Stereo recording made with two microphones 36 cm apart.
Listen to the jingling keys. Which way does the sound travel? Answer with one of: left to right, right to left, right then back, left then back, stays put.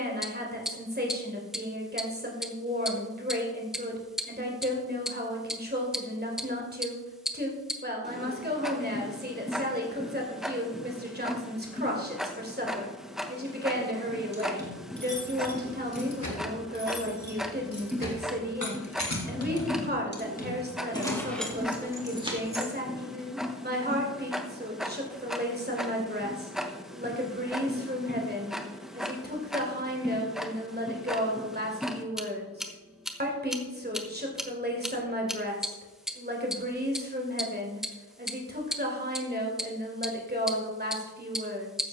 left then back.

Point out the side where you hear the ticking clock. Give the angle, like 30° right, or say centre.
centre.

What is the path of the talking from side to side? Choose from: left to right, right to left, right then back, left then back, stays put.
stays put.